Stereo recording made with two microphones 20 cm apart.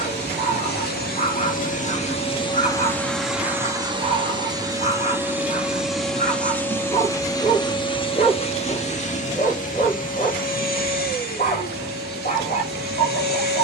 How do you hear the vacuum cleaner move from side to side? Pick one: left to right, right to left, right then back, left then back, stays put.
right then back.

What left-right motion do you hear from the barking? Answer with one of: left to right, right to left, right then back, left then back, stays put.
stays put.